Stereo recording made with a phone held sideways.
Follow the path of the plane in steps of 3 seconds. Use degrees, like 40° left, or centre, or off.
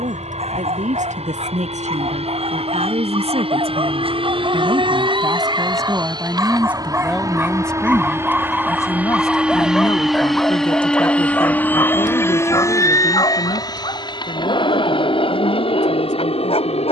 60° right, 40° right, 20° right, centre, 30° left, 40° left.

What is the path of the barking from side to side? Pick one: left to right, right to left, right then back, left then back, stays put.
right to left.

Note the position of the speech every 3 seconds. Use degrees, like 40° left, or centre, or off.
60° right, 40° right, centre, 40° left, 50° left, 60° left.